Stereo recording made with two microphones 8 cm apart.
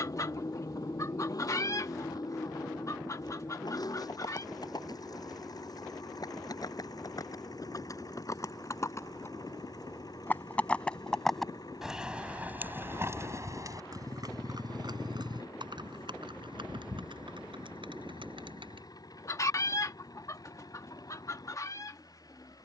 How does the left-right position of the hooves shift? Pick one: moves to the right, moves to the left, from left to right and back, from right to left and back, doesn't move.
moves to the right.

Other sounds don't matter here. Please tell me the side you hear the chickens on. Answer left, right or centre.
left.